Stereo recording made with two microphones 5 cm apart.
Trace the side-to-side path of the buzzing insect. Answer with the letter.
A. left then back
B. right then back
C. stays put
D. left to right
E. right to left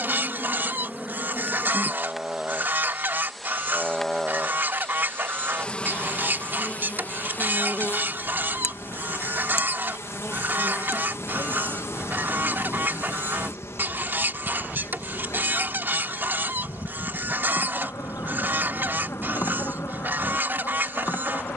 E.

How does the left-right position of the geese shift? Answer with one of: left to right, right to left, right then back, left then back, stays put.
stays put.